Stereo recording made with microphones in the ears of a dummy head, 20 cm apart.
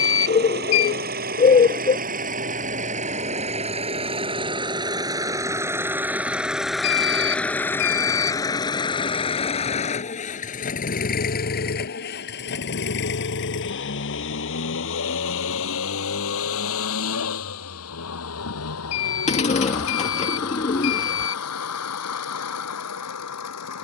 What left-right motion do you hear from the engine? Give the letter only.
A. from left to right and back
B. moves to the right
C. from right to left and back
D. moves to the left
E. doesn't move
D.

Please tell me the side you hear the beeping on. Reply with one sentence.
In this clip you hear the beeping on the left.